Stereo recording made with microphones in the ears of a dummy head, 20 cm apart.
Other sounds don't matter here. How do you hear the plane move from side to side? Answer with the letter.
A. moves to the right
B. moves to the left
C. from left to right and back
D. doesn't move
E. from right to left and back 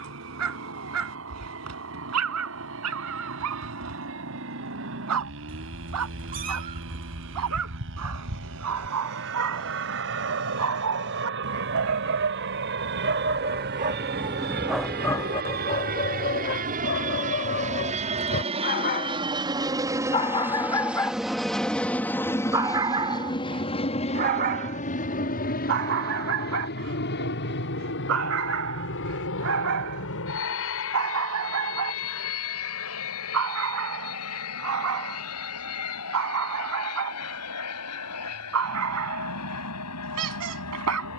B.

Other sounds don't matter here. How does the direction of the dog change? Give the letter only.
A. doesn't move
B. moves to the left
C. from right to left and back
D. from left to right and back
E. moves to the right
C.